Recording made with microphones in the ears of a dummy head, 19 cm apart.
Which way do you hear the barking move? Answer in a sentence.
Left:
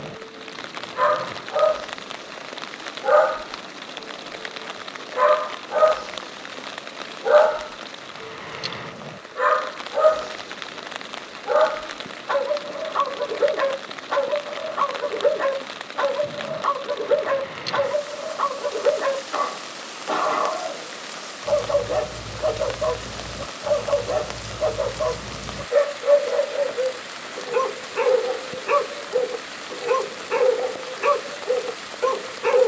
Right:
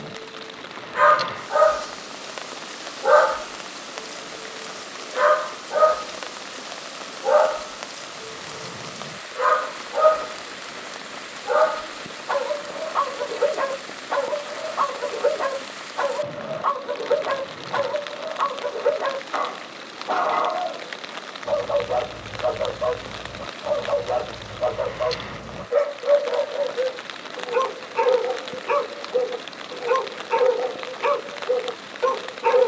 In this clip you hear the barking travel towards the left.